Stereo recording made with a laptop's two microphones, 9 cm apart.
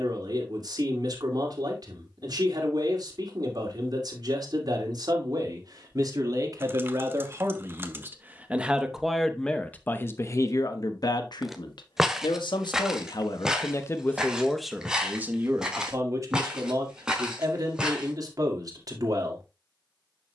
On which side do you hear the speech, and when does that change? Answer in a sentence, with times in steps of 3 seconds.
In this clip you hear the speech on the right from 0 s, on the left from 9 s and on the right from 15 s.